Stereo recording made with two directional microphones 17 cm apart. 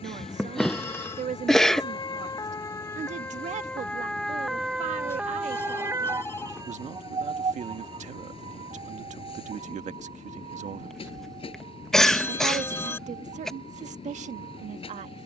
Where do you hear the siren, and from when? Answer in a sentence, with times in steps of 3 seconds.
You can hear the siren on the left from 0 s, in the centre from 3 s and on the right from 6 s.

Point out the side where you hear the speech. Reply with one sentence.
In this clip you hear the speech on the right.